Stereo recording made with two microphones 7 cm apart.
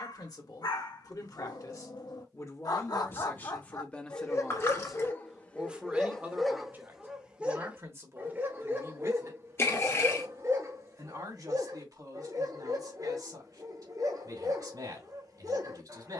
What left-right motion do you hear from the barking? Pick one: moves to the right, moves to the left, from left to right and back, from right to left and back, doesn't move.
moves to the right.